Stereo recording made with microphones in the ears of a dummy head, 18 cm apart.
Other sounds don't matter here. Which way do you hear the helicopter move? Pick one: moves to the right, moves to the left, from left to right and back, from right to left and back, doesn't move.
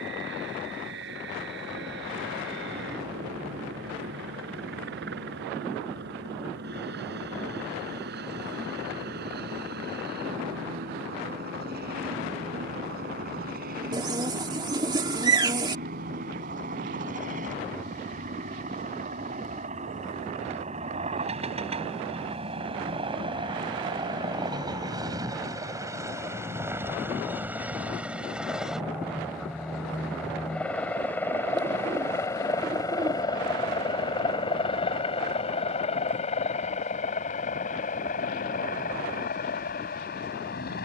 moves to the left.